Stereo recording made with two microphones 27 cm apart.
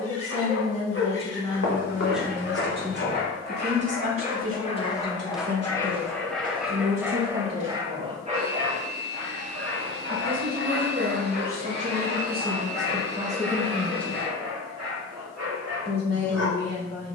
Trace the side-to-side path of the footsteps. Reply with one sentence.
In this clip you hear the footsteps move from left to right.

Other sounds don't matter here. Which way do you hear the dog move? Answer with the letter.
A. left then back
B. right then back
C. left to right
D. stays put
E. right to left
C.